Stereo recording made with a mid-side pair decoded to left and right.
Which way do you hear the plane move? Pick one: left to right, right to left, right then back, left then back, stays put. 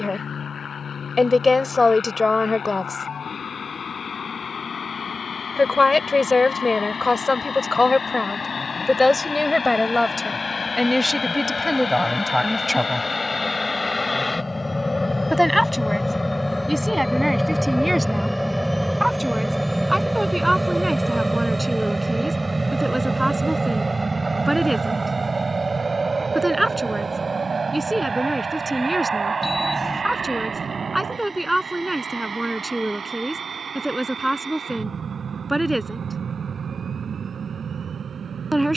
left to right.